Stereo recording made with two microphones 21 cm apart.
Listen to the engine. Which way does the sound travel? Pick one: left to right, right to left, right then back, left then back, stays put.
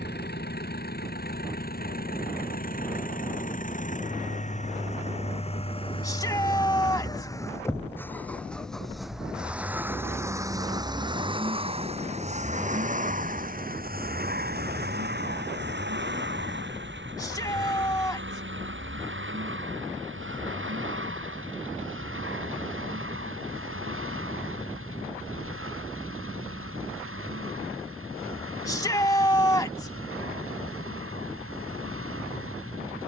left to right.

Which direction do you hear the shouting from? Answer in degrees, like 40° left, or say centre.
20° left.